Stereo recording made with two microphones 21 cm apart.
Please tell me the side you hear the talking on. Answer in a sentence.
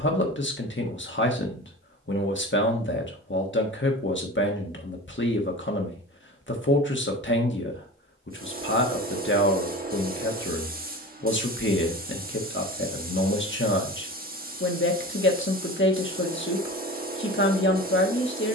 In this clip you hear the talking on the left.